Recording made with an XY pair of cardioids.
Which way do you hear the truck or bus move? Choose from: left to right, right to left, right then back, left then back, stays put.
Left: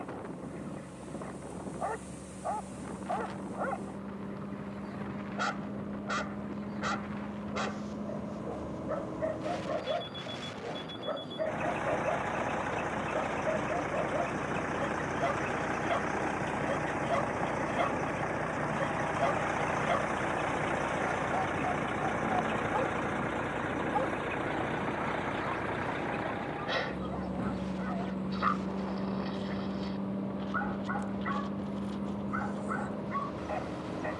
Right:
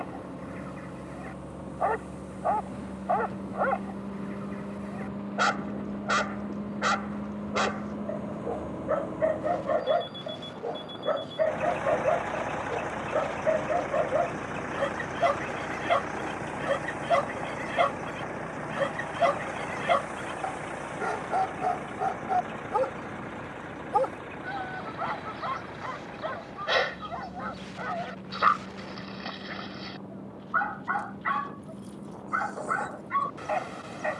right to left.